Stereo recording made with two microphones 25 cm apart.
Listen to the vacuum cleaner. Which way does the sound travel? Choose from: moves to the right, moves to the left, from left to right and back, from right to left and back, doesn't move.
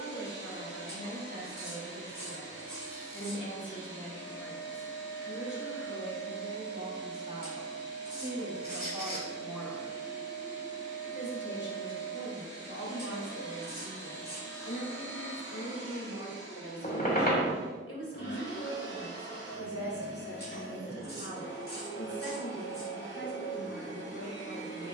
doesn't move.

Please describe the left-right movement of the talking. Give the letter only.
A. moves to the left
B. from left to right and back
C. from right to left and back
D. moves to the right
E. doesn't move
B.